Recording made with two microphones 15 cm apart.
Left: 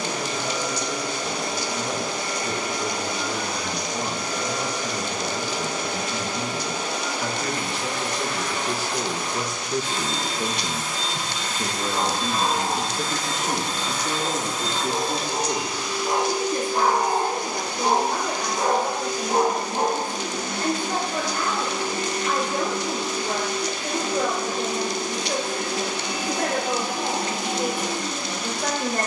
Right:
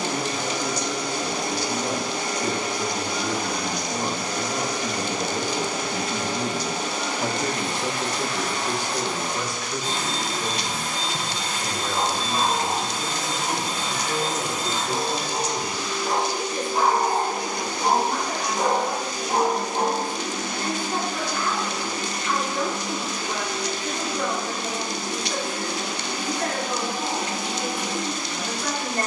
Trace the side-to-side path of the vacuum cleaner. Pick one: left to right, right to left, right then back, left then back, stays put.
right to left.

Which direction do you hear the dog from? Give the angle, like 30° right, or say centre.
10° right.